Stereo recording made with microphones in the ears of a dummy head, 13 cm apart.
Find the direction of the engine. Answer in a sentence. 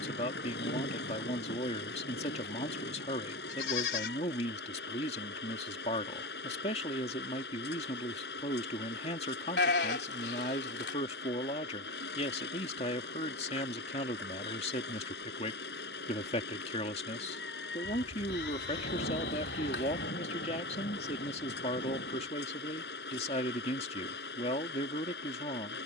You can hear the engine on the left.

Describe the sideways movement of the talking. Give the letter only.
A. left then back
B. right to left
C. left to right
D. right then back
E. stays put
E.